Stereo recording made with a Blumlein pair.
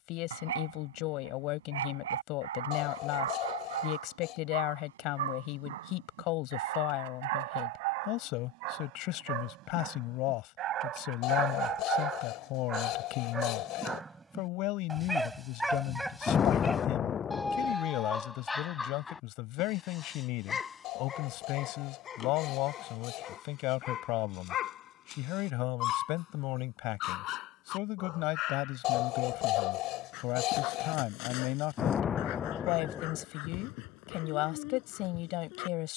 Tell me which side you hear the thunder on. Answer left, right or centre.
left.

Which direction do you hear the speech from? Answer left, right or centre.
left.